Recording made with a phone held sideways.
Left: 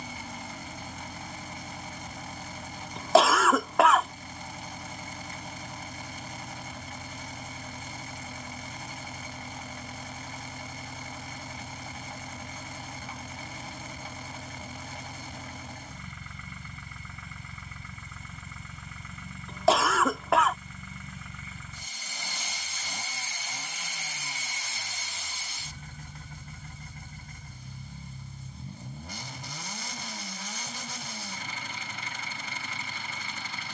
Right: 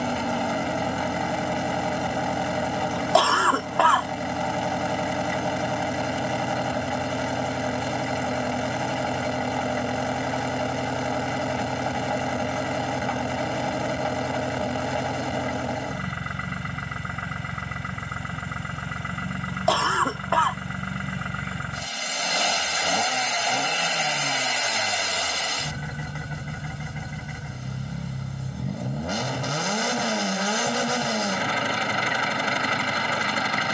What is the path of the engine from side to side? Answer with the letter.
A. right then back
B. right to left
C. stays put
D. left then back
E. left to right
C.